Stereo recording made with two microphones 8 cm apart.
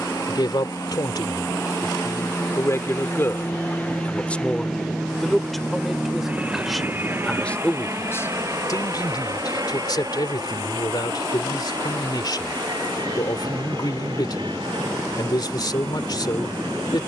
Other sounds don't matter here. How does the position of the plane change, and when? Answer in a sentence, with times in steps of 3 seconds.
In this clip you hear the plane on the left from 0 s, in the centre from 3 s and on the right from 6 s.